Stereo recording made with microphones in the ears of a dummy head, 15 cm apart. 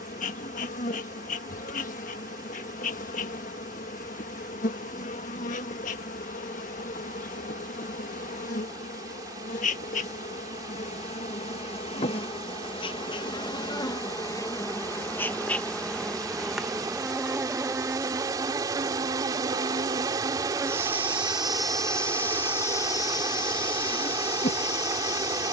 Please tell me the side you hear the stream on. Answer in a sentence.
In this clip you hear the stream on the right.